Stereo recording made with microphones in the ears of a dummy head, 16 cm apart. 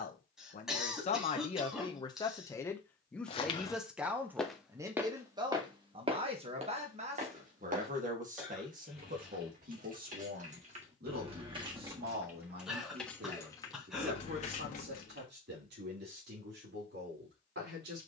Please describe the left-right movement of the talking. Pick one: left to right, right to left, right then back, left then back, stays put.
left to right.